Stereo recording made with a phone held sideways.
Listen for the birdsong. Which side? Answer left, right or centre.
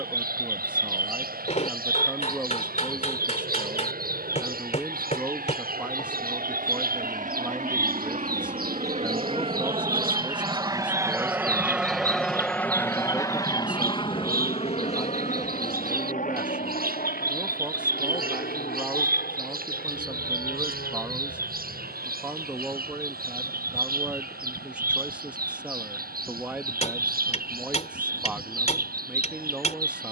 right.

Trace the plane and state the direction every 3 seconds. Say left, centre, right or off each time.
right, right, right, right, left, left, left, left, left, left.